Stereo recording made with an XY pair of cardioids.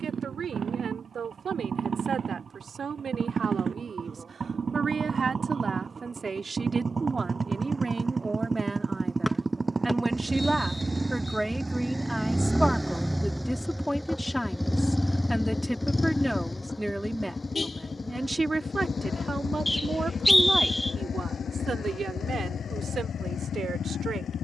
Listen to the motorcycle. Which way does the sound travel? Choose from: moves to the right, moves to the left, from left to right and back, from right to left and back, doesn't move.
moves to the left.